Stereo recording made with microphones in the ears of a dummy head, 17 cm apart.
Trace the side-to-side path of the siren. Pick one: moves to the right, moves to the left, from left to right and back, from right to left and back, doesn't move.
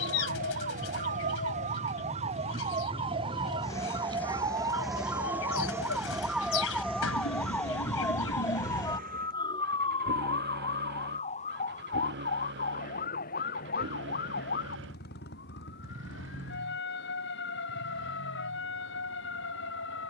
moves to the left.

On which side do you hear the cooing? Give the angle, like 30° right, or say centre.
80° left.